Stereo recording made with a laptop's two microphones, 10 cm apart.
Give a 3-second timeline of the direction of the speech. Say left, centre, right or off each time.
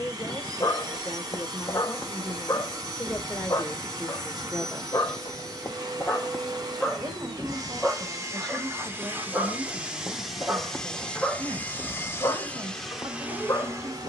left, centre, right, right, right.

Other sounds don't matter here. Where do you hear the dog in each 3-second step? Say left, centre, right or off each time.
left, left, centre, centre, left.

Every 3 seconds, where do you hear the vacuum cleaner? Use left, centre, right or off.
right, right, right, centre, centre.